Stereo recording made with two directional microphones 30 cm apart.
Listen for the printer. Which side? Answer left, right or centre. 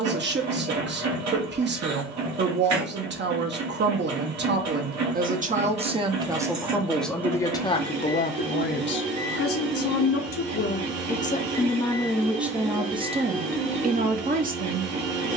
right.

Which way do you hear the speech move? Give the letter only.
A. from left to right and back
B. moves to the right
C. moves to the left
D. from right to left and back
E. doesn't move
D.